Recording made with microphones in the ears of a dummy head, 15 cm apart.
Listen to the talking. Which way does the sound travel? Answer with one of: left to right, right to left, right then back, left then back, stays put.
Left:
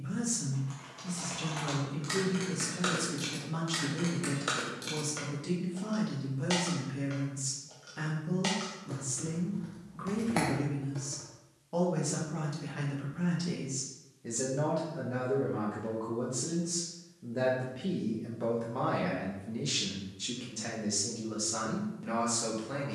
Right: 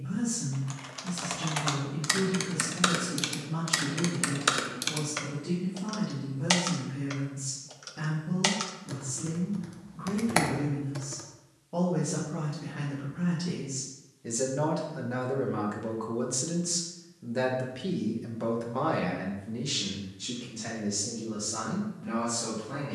right then back.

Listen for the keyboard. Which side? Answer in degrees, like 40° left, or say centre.
60° right.